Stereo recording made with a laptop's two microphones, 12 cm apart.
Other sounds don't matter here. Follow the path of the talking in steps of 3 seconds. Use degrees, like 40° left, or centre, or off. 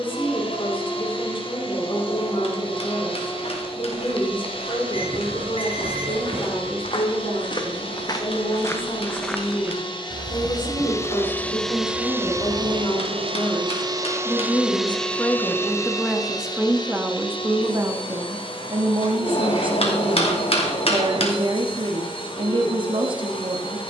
50° left, 50° left, 50° left, 40° left, 30° left, 10° right, 40° right, 50° right.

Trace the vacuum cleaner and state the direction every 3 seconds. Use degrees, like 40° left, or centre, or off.
50° left, 50° left, 50° left, 30° left, 30° right, 30° left, 50° left, 50° left.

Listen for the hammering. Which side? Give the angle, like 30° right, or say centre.
60° left.